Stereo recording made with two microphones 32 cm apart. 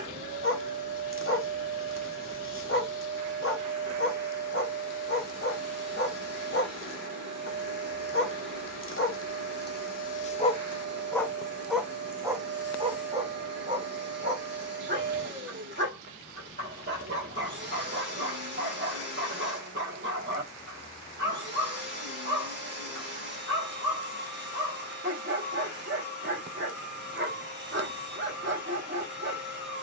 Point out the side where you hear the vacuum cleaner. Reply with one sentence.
You can hear the vacuum cleaner on the right.